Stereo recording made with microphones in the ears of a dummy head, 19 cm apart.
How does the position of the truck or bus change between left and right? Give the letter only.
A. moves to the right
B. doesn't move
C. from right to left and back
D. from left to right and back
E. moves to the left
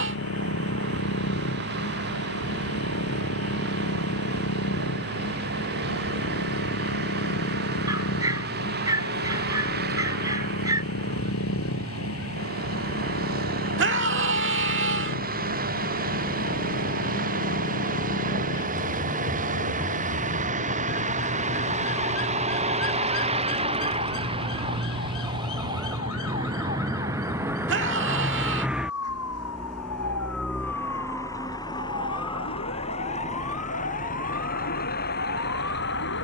E.